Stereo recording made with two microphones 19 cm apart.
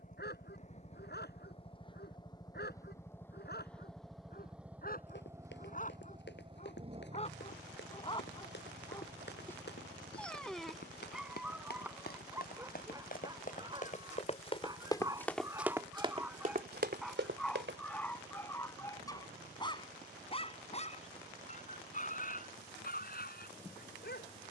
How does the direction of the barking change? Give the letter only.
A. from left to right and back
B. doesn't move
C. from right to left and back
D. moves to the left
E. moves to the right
A.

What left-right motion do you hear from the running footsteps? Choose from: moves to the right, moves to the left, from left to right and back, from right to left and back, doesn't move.
moves to the right.